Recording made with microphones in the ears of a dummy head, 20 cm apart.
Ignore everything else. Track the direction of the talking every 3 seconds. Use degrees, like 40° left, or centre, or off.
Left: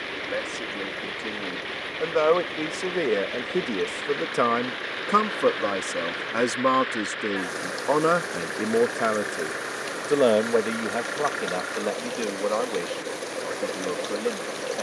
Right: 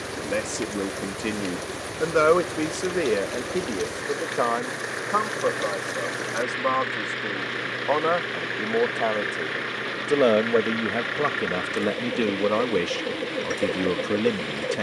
30° right, 30° left, 40° left, 10° right, 40° right.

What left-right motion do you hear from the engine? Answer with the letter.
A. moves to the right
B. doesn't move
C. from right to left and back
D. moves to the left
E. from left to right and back
B.